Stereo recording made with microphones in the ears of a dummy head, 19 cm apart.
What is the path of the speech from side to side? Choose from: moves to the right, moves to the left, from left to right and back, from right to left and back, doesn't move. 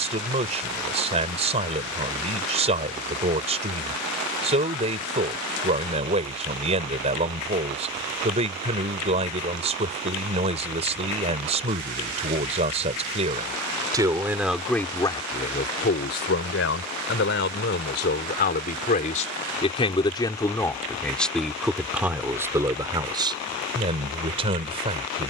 from right to left and back.